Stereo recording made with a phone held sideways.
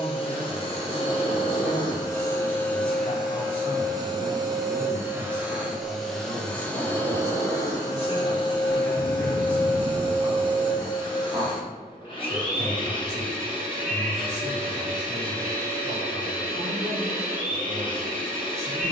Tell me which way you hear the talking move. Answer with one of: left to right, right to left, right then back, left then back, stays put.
left to right.